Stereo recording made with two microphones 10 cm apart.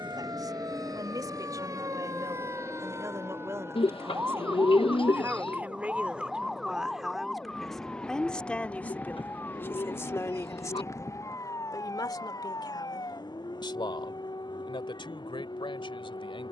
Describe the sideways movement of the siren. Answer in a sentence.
In this clip you hear the siren go from the right side to the left.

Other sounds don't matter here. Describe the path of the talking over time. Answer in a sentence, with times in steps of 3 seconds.
You can hear the talking on the right from 0 s, in the centre from 6 s and on the left from 9 s.